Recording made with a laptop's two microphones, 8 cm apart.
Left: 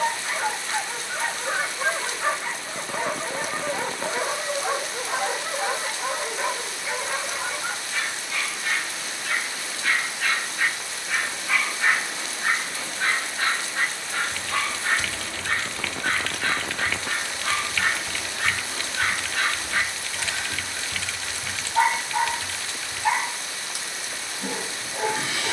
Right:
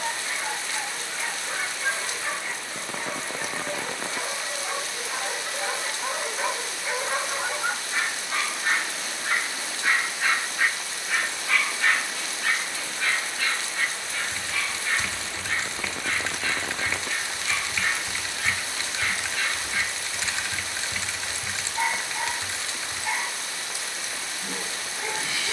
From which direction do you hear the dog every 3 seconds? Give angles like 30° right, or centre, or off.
60° left, 40° left, 20° right, 10° right, 40° left, 60° left, 60° left, 60° left, 60° left.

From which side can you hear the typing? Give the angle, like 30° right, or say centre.
20° right.